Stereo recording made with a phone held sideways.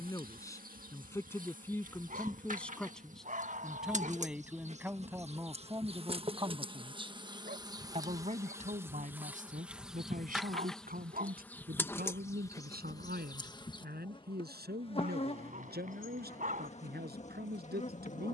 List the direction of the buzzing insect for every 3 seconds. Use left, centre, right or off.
right, right, right, centre, left, left.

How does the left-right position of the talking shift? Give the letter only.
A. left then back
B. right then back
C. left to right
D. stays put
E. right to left
C.